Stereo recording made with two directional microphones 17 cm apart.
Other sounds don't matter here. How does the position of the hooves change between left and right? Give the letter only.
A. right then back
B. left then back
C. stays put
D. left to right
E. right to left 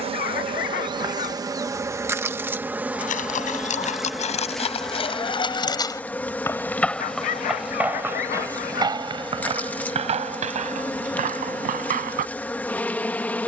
D.